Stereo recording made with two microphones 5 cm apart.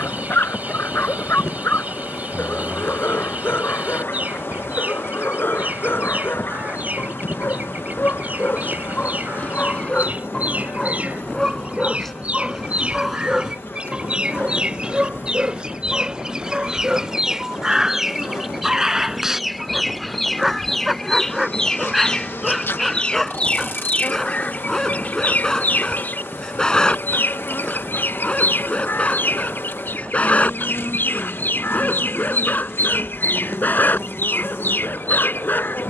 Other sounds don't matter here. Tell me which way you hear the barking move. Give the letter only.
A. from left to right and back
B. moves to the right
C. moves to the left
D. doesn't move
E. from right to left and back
A.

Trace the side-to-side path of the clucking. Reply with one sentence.
In this clip you hear the clucking move to the left.